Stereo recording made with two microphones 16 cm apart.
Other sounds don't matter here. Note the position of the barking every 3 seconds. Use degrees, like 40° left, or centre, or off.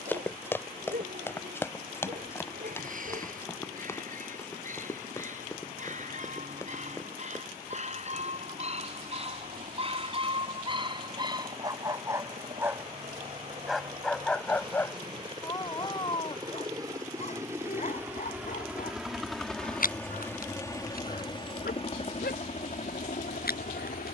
60° right, 60° right, 50° right, 30° right, centre, 40° left, 60° left, 80° left.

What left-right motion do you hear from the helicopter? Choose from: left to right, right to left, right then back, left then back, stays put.
right to left.